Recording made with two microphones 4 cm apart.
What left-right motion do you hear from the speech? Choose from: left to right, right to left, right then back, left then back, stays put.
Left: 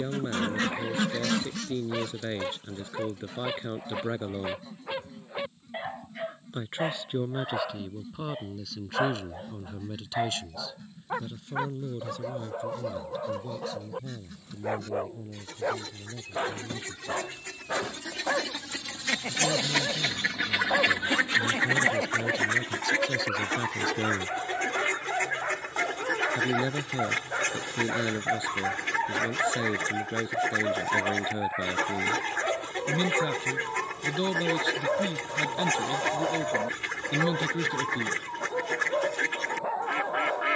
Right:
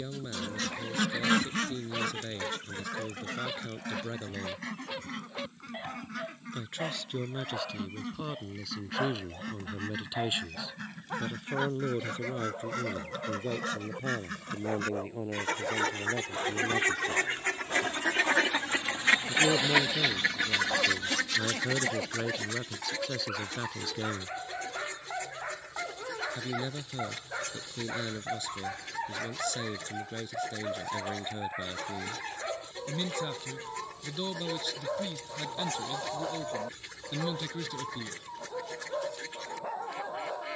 right then back.